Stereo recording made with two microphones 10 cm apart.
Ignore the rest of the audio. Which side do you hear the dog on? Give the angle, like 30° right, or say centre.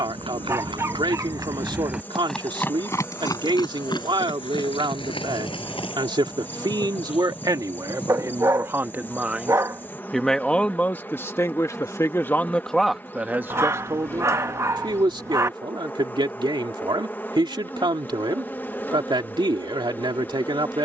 30° right.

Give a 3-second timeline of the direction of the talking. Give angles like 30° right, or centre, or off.
50° right, 50° right, 40° right, 10° left, 20° right, 50° right, 50° right.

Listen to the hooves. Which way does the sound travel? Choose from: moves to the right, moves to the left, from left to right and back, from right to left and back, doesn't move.
moves to the left.